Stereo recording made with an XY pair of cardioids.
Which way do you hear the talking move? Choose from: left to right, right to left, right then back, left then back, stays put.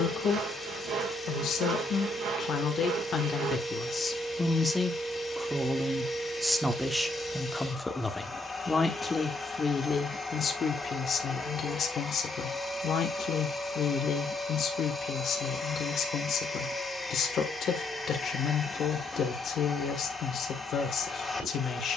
right then back.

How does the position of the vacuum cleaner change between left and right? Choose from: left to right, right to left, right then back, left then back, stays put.
stays put.